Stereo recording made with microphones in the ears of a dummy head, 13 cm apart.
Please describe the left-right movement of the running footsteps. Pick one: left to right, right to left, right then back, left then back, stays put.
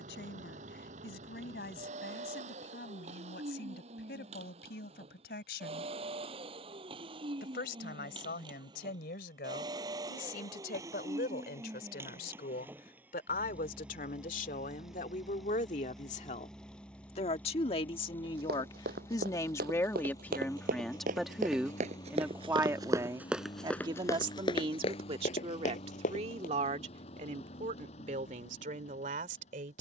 right to left.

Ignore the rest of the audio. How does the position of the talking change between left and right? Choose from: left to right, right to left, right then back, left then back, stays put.
left to right.